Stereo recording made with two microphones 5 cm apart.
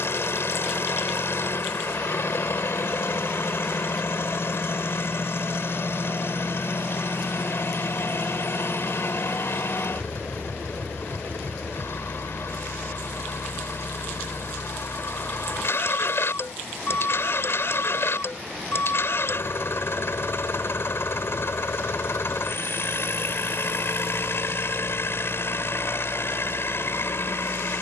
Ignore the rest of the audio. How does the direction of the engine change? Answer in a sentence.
You can hear the engine stay put.